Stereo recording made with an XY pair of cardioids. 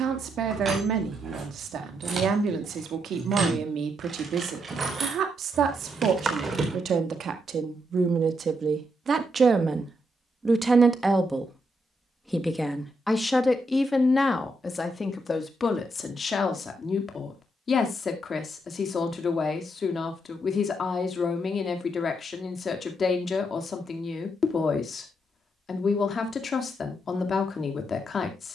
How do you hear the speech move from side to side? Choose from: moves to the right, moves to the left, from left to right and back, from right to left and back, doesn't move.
moves to the left.